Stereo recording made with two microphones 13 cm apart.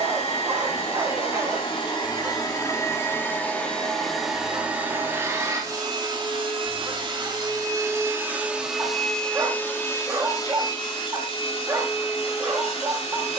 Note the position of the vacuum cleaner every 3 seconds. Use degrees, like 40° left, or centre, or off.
40° left, 10° right, 20° right, 30° left, 50° left.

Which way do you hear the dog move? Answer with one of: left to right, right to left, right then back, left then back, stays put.
stays put.